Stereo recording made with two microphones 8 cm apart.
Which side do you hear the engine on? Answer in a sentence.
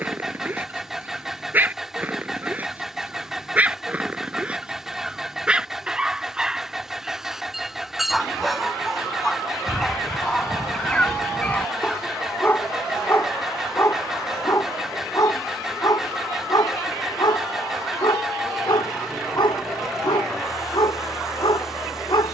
You can hear the engine in the centre.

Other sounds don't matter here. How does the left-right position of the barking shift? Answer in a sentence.
In this clip you hear the barking travel towards the left.